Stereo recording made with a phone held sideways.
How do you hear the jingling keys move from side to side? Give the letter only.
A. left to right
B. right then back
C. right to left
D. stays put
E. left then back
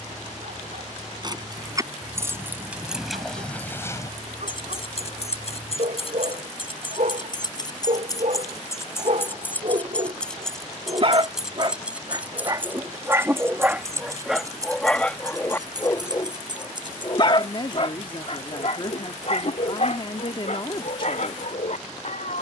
E.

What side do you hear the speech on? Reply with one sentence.
In this clip you hear the speech on the left.